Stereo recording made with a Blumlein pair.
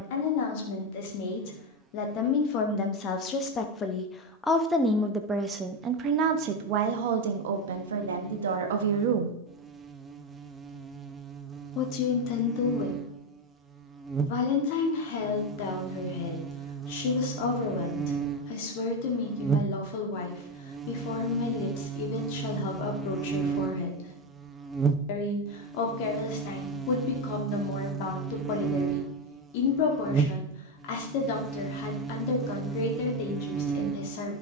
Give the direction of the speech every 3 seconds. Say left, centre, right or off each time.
left, centre, right, centre, left, left, left, left, left, left, left, left.